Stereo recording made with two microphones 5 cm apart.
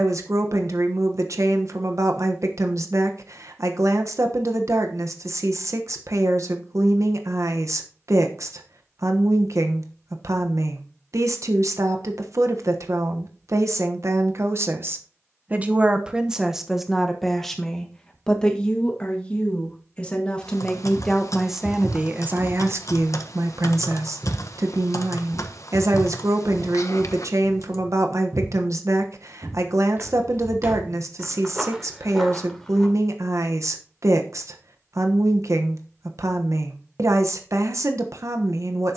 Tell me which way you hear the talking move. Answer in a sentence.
In this clip you hear the talking go left and come back.